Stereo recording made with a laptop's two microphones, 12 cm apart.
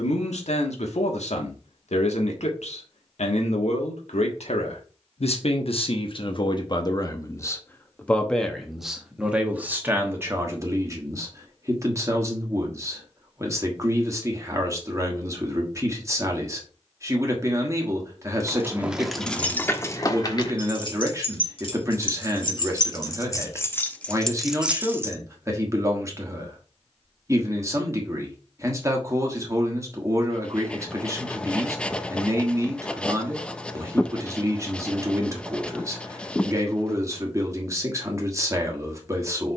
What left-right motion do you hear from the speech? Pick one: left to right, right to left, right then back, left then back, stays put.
left to right.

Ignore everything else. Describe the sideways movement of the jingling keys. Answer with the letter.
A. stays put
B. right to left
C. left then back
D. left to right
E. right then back
C.